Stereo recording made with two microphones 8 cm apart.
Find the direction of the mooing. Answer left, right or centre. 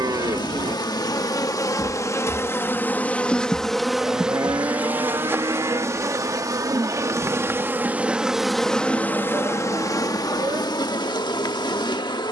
right.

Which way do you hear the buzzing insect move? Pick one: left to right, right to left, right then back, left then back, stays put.
right then back.